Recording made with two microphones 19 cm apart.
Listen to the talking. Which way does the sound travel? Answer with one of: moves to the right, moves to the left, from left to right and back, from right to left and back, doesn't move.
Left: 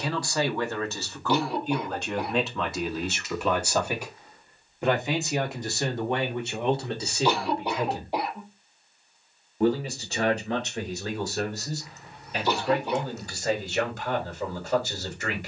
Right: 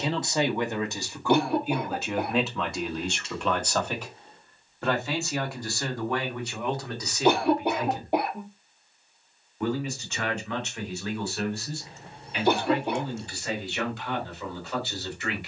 moves to the left.